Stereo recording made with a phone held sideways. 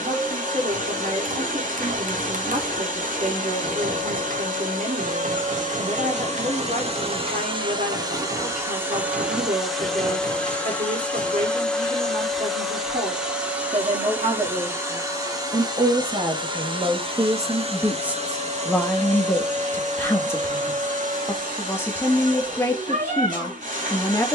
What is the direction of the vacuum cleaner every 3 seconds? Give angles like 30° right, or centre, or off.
70° right, 70° right, 40° right, centre, 10° right, 30° right, 60° right, 70° right.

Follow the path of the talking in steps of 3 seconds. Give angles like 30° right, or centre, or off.
70° right, 70° right, 70° right, 70° right, 70° right, 30° right, 10° left, 20° left.